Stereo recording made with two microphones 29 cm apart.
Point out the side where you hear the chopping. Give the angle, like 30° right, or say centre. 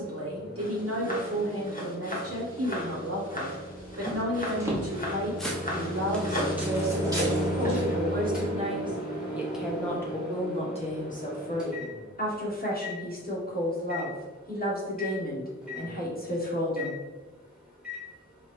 30° left.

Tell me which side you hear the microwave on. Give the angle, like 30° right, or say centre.
centre.